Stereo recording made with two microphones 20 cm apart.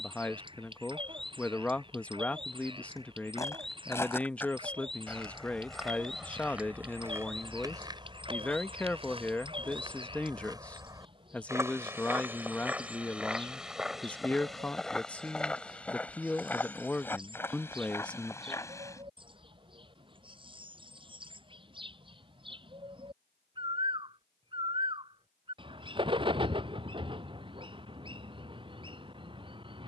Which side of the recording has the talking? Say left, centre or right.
centre.